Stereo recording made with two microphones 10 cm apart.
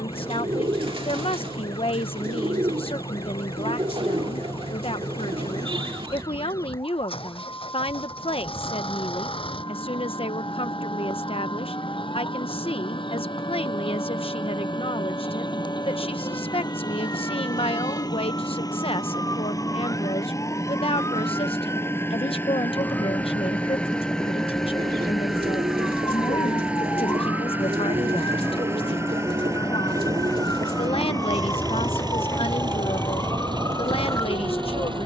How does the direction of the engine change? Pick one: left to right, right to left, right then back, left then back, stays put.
left to right.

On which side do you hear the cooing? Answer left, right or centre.
right.